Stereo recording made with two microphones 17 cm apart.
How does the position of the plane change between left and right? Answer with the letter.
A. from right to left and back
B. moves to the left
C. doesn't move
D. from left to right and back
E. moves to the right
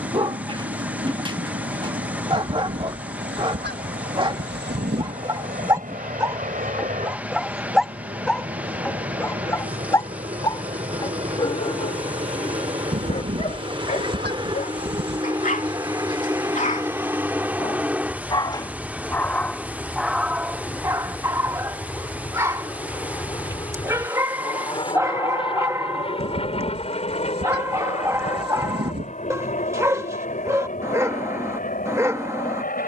B.